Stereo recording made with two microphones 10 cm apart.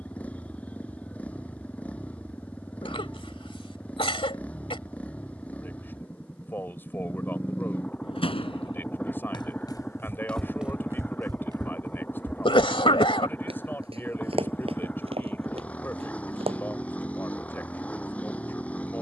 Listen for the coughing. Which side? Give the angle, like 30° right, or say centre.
70° left.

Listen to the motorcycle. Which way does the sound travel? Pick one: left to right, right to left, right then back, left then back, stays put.
stays put.